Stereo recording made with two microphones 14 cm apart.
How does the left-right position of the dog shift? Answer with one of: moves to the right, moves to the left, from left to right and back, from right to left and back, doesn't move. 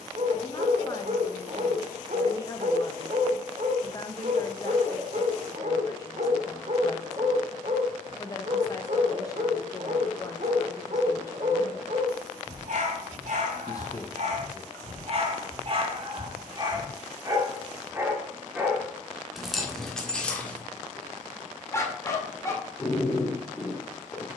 moves to the left.